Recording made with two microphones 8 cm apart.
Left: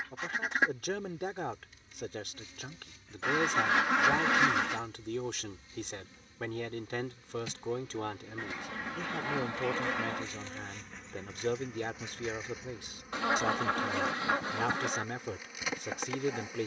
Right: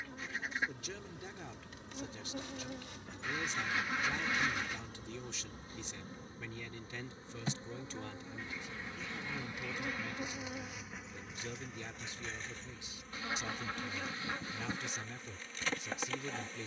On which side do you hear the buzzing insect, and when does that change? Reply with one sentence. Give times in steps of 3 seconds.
You can hear the buzzing insect on the right from 0 s and in the centre from 9 s.